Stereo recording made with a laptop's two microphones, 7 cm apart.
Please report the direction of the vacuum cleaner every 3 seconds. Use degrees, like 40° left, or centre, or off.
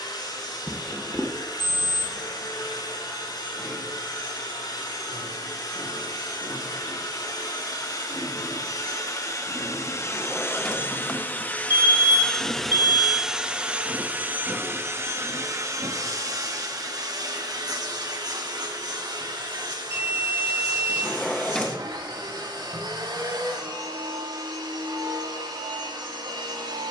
70° left, 70° left, 60° left, 40° left, 10° right, 50° right, 70° right, 70° right, 80° right.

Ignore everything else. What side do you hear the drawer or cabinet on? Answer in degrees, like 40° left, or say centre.
10° left.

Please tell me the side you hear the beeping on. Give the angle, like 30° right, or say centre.
40° right.